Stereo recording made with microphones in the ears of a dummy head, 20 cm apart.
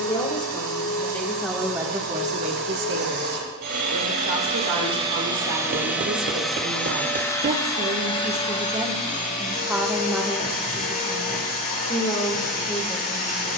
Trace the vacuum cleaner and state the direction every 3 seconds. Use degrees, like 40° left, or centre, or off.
60° right, 30° right, 20° left, 40° left, 40° left.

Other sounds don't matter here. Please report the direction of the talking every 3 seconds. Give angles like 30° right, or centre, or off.
10° right, 70° right, 40° right, centre, 20° left.